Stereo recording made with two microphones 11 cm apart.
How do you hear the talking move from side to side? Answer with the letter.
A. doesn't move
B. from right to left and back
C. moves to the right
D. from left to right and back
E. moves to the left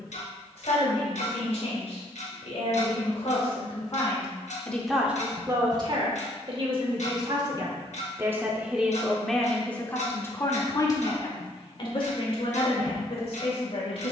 D.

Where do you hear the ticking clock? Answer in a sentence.
You can hear the ticking clock on the left.